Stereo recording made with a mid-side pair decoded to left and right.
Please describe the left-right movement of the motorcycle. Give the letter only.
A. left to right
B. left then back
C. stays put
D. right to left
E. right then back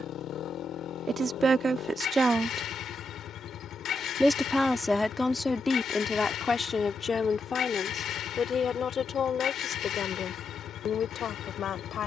C.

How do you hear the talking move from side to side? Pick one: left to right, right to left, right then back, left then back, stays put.
right to left.